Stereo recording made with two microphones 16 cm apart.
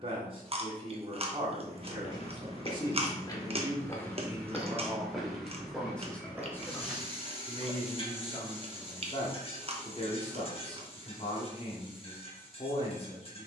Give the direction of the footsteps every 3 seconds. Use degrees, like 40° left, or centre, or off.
40° left, 10° left, 10° right, off, off.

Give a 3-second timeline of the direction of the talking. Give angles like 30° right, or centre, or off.
30° right, 10° right, 20° left, 40° left, 40° left.